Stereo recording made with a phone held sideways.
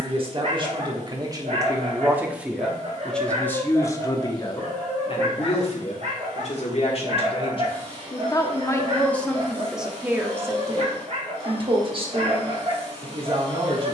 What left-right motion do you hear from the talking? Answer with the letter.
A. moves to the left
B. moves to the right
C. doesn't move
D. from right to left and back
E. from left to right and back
D.